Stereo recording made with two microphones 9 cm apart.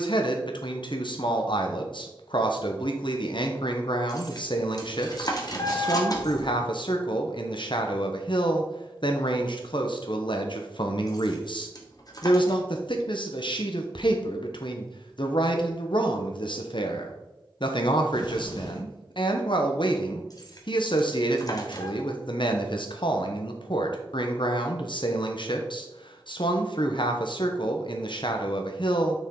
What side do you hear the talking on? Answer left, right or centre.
left.